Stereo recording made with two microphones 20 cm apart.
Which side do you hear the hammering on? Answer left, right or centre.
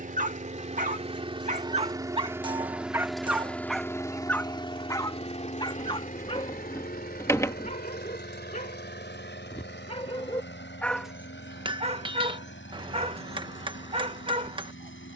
right.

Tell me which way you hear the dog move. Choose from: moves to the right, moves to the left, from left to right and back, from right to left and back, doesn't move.
from right to left and back.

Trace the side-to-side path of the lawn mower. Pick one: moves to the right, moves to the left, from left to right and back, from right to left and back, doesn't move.
moves to the left.